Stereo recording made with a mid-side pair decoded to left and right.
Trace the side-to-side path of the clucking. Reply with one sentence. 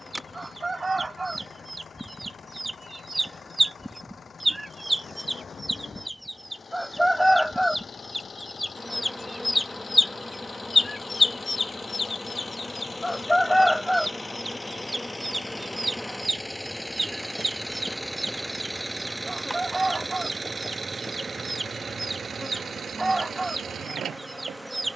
In this clip you hear the clucking go left and come back.